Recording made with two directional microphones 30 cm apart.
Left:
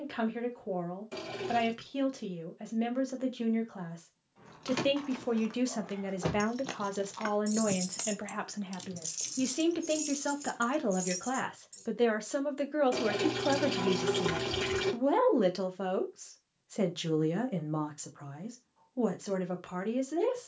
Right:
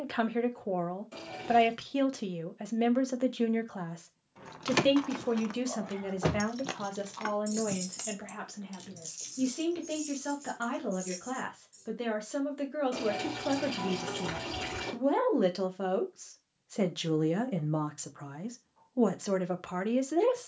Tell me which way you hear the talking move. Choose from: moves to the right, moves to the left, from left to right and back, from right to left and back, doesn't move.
from right to left and back.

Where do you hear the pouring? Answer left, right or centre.
left.